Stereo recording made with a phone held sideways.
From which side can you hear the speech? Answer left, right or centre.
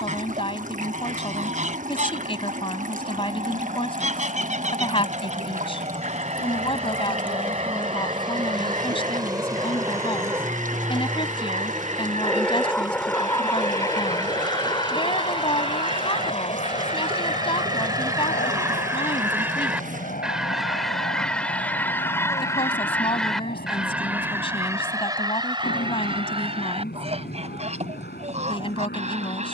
left.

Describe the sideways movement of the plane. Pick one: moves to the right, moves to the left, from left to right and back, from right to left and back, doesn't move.
moves to the left.